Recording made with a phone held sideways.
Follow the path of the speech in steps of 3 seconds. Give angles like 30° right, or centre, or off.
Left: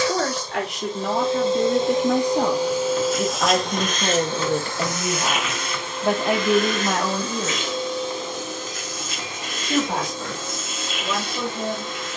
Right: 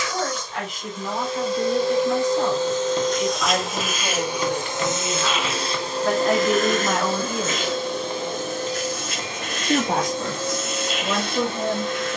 70° left, 40° left, centre, 40° right.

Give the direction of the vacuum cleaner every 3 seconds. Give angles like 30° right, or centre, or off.
20° left, 20° right, 50° right, 60° right.